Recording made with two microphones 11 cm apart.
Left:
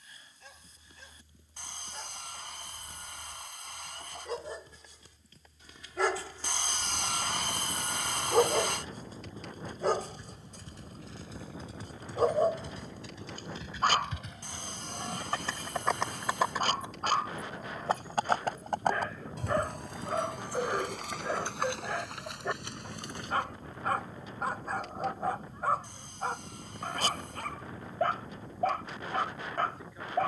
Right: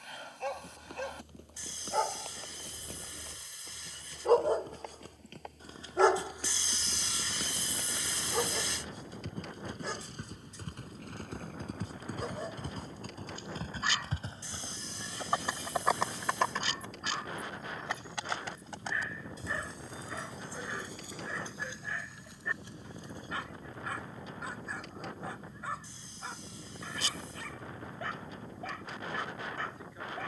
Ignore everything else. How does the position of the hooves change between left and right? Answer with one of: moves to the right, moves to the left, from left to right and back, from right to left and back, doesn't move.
moves to the left.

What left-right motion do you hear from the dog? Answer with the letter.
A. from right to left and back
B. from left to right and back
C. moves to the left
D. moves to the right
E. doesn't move
C.